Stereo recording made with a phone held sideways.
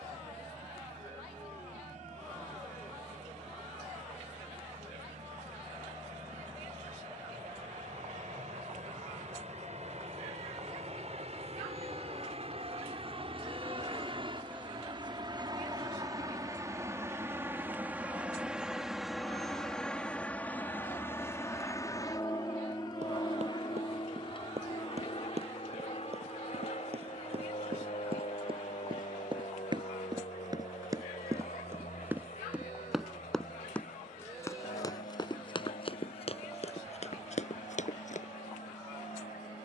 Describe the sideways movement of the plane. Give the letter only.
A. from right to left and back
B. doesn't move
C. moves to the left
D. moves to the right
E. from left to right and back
C.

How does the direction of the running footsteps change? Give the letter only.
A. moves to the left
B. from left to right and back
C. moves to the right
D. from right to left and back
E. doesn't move
A.